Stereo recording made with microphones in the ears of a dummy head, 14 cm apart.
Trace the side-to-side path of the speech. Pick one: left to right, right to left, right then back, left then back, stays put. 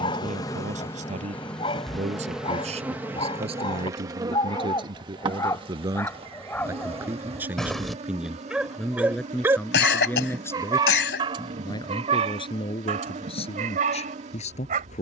right to left.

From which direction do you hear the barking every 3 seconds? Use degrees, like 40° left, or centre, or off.
30° left, 20° left, centre, 20° right, 40° right.